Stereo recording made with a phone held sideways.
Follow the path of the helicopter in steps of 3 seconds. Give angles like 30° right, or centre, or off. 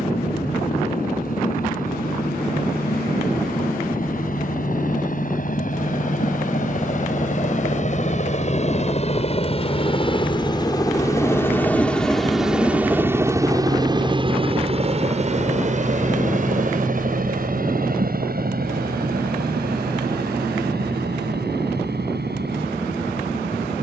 70° left, 70° left, 60° left, 30° left, 20° right, 50° right, 60° right, 70° right.